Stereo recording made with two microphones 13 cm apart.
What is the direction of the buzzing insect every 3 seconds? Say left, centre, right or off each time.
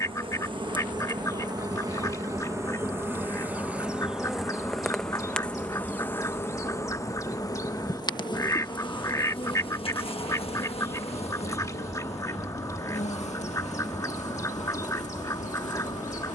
right, centre, left, left, left, left.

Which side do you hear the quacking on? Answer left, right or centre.
left.